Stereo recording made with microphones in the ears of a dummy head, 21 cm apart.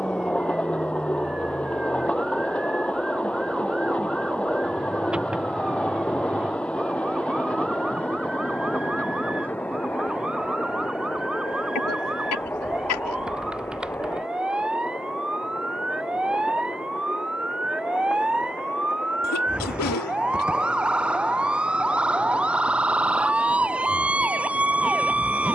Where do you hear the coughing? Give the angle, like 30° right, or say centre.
70° left.